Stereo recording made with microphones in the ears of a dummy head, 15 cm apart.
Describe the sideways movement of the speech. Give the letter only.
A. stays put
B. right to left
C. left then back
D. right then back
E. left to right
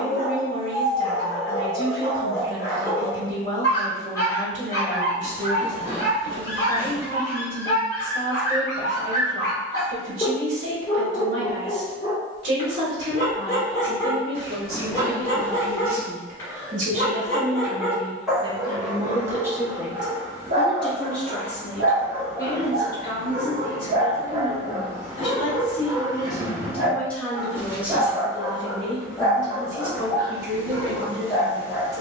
C.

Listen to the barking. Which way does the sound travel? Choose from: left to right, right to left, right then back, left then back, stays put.
right then back.